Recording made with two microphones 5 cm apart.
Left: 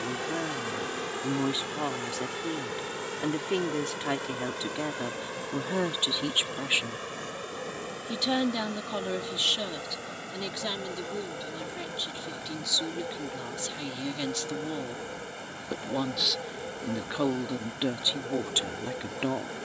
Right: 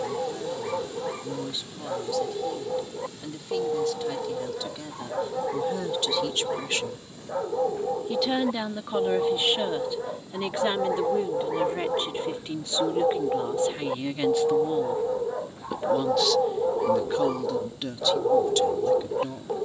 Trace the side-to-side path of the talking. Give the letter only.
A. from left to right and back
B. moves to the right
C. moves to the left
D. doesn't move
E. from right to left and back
A.